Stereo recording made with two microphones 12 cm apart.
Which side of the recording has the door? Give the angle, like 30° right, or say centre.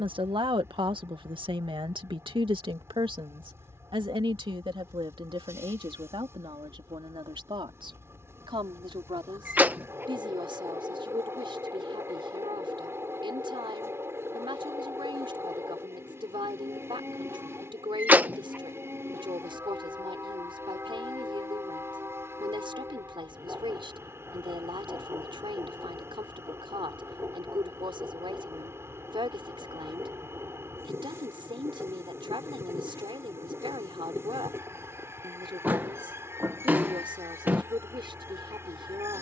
10° right.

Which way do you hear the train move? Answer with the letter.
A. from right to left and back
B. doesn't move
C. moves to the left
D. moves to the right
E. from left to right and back
B.